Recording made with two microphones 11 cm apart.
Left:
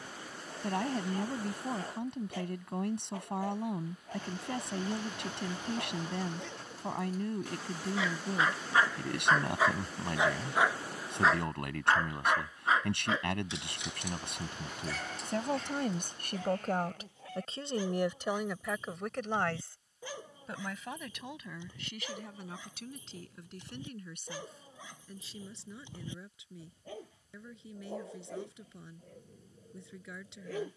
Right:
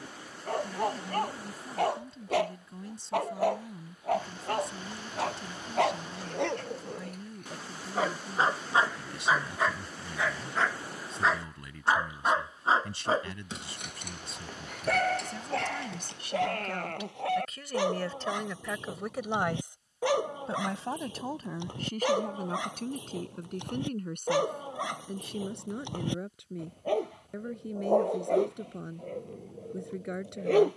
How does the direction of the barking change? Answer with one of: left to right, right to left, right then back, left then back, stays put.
left then back.